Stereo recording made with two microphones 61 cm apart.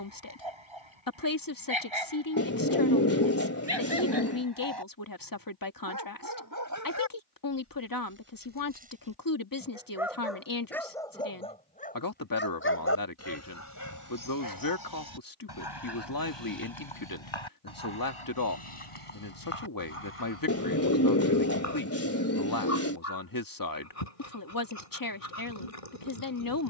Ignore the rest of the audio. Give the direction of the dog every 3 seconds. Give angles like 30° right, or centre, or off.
50° right, 40° right, 20° right, centre, 30° left, 40° left, 60° left, 60° left, 60° left.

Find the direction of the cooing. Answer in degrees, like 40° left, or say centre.
20° left.